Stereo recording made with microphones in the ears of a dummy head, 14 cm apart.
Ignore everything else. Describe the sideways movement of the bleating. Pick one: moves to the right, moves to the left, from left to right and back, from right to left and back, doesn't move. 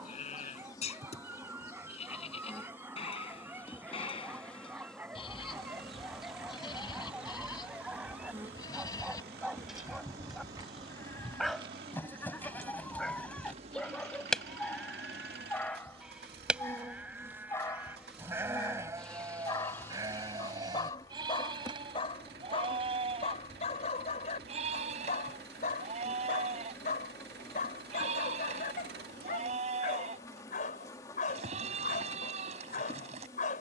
moves to the right.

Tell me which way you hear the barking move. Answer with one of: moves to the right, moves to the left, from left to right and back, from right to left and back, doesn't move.
moves to the left.